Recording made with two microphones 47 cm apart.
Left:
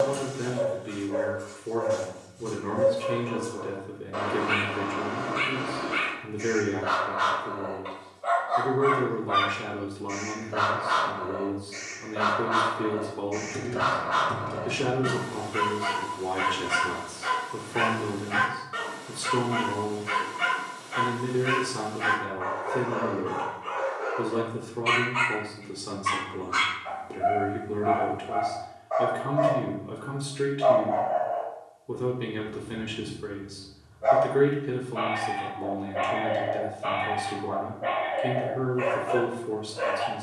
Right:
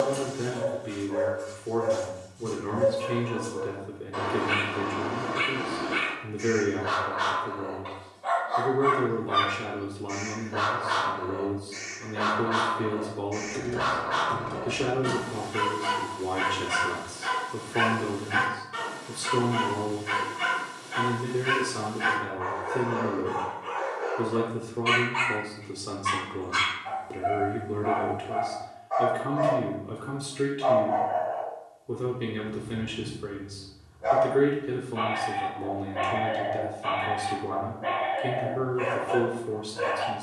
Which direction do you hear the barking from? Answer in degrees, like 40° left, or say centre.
10° right.